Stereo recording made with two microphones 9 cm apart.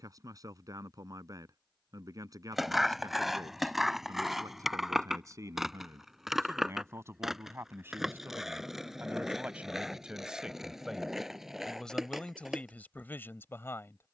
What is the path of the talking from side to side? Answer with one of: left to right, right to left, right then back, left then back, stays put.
right to left.